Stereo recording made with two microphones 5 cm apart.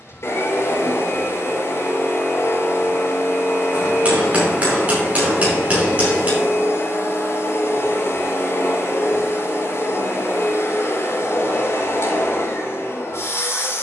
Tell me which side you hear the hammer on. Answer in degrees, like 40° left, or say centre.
30° right.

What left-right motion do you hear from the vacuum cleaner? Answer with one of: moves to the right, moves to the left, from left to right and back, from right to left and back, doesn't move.
doesn't move.